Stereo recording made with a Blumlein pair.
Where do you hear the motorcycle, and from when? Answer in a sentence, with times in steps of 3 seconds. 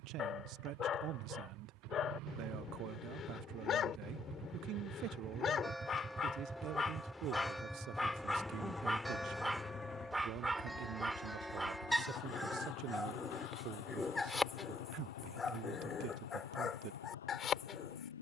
In this clip you hear the motorcycle on the right from 0 s, in the centre from 6 s and on the left from 9 s.